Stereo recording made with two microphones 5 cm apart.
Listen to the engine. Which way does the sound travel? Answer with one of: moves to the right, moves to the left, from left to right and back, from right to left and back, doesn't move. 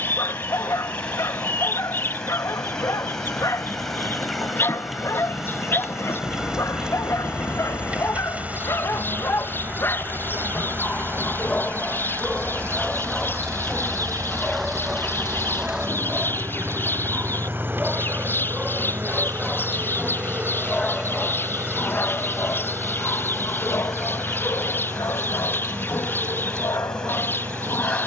moves to the right.